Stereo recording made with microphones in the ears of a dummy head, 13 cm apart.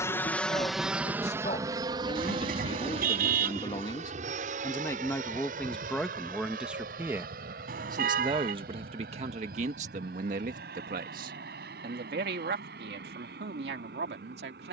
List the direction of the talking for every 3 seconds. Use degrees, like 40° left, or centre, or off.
40° left, 20° left, 20° right, 50° right, 70° right.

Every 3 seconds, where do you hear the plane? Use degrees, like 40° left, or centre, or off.
20° right, 50° right, 60° right, 60° right, 60° right.